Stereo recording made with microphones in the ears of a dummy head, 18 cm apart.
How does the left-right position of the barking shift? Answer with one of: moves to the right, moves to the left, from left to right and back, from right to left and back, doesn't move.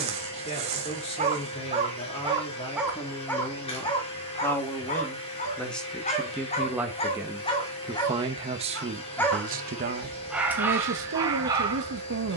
from right to left and back.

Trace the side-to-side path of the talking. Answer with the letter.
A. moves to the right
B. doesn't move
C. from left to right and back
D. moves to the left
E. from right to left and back
A.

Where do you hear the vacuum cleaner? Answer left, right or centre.
left.